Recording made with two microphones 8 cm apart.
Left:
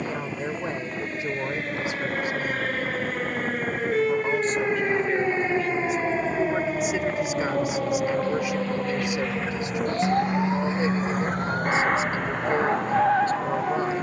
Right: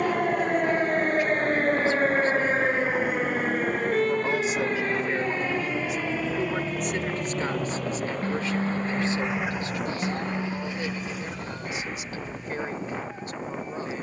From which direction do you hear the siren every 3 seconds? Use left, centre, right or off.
right, centre, left, left, left.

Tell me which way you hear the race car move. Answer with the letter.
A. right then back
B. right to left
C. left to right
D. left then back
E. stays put
B.